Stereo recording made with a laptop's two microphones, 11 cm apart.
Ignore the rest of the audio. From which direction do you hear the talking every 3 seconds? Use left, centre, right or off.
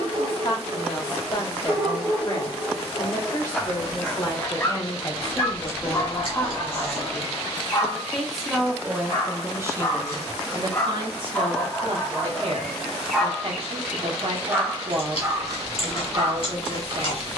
left, left, centre, right, right, right.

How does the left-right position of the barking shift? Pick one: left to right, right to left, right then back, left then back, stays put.
left then back.